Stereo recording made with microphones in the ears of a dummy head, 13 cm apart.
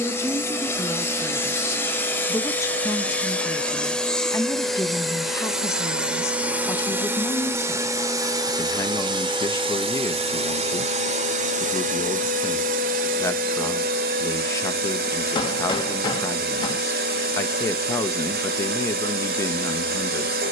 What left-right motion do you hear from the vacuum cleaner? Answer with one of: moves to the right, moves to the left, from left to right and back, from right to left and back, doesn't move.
moves to the right.